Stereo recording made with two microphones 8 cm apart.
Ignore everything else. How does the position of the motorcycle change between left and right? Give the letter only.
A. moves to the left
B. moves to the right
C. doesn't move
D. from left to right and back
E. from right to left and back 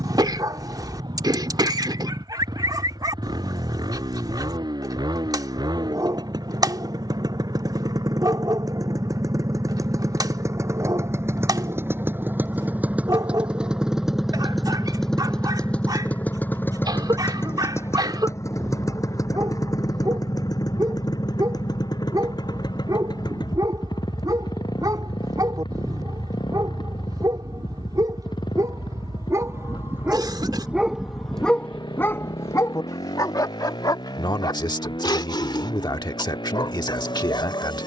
A.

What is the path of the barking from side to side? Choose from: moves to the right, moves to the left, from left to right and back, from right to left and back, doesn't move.
moves to the left.